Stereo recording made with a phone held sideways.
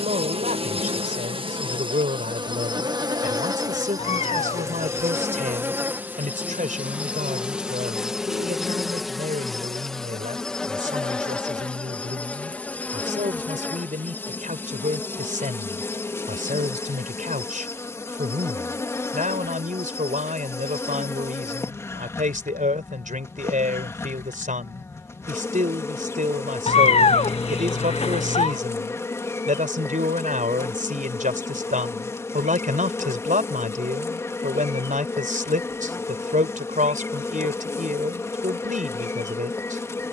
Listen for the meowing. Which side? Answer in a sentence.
In this clip you hear the meowing on the left.